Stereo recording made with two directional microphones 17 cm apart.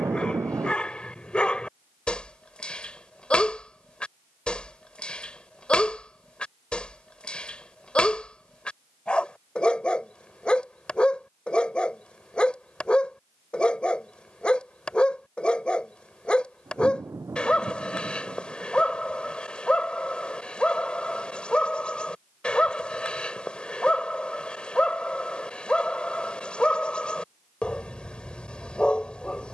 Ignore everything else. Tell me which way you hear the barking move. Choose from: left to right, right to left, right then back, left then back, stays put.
stays put.